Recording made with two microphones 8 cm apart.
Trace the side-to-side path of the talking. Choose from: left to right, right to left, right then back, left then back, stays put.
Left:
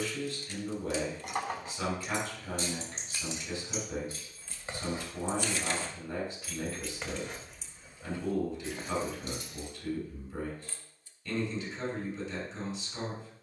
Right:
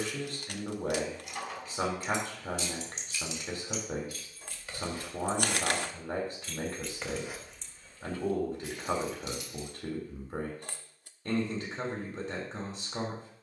stays put.